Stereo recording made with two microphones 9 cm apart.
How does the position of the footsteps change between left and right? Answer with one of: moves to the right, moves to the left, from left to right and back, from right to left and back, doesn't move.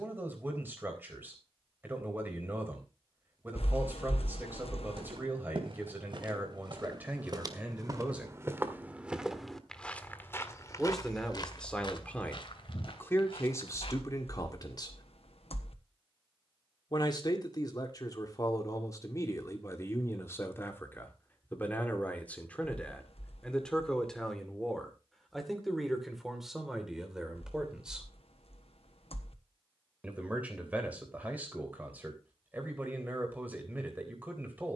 moves to the left.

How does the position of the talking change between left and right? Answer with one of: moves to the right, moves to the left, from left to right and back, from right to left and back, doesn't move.
from right to left and back.